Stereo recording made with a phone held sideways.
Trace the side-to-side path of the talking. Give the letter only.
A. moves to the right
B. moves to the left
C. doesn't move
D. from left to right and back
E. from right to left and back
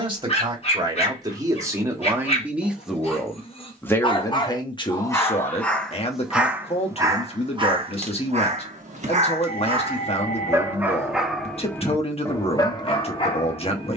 B.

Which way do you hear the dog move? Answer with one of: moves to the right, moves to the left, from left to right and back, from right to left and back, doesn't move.
from left to right and back.